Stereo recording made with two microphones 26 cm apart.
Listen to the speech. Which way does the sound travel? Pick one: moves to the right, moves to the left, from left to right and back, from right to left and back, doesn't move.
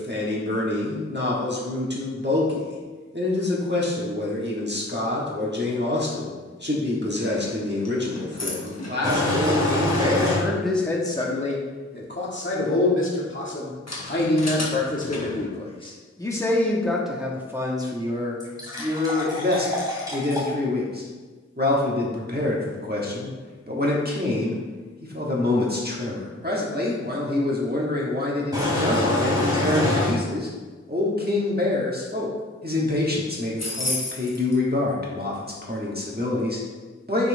from right to left and back.